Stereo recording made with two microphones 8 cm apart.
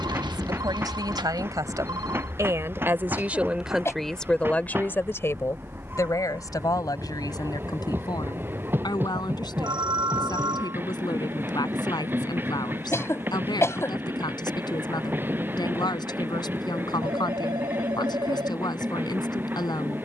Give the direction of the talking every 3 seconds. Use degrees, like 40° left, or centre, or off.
50° right, 10° left, 60° left, 70° left, 70° left, 70° left, 70° left.